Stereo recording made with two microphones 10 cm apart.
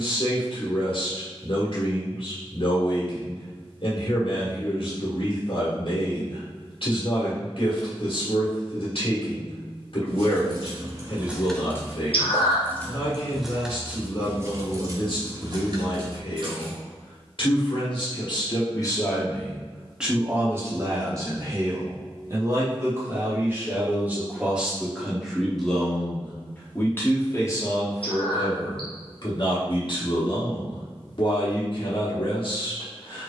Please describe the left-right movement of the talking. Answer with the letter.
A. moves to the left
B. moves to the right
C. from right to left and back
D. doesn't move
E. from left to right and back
E.